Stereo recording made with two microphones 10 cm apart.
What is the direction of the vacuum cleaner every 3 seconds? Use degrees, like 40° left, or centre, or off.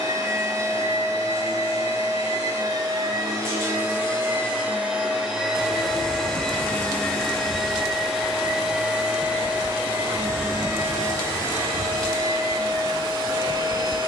40° right, 20° right, centre, 20° right, 40° right.